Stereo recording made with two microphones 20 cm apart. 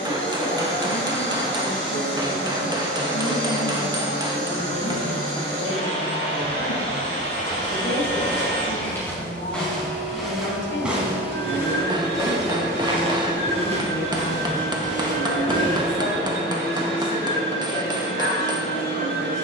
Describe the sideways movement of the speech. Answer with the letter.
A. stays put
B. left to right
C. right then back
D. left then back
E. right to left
A.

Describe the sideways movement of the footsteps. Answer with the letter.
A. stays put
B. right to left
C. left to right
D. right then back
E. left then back
C.